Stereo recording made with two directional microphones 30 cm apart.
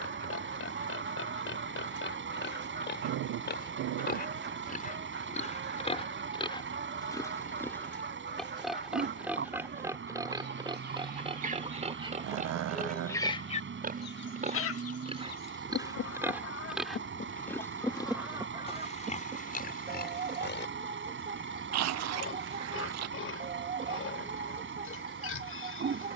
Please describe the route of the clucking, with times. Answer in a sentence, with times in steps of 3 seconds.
You can hear the clucking on the right from 0 s, on the left from 12 s and on the right from 18 s.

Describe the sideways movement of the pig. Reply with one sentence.
In this clip you hear the pig go right and come back.